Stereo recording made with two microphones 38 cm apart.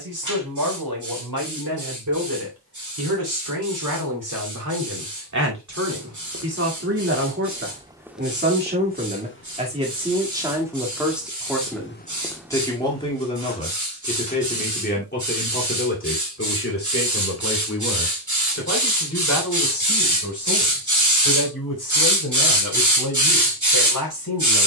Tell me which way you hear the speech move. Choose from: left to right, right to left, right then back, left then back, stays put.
right to left.